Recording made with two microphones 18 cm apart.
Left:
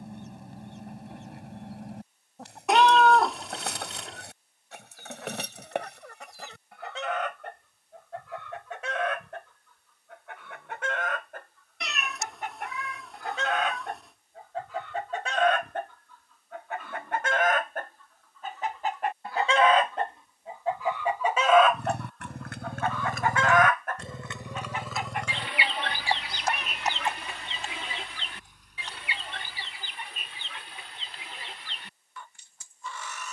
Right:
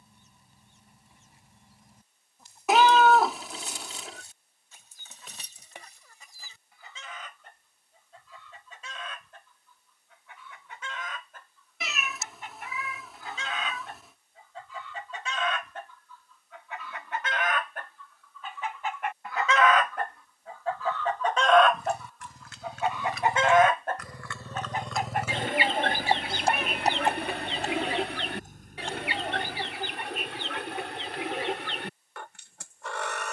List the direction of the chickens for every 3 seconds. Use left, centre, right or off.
left, left, left, left, left, left, left, centre, right, right, right.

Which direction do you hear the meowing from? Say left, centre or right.
centre.